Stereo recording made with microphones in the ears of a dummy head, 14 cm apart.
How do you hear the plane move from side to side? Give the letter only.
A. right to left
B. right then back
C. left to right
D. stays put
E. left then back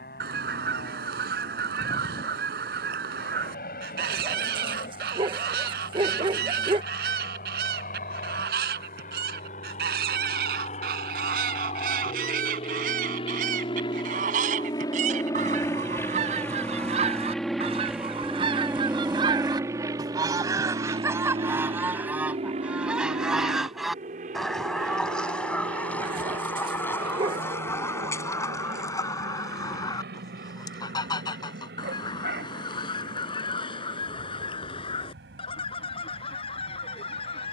C.